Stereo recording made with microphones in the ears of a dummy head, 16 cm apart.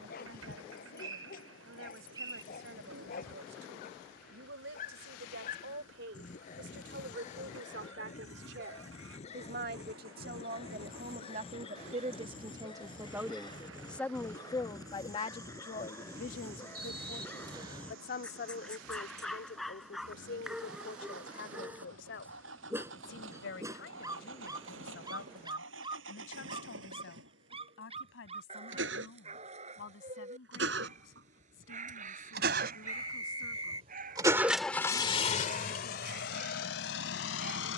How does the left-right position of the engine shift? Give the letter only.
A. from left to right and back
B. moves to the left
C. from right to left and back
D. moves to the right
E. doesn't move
B.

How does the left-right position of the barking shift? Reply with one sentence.
In this clip you hear the barking go from the left side to the right.